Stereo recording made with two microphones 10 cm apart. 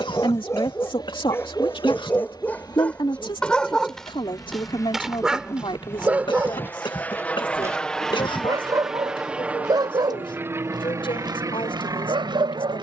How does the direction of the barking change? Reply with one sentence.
You can hear the barking travel towards the right.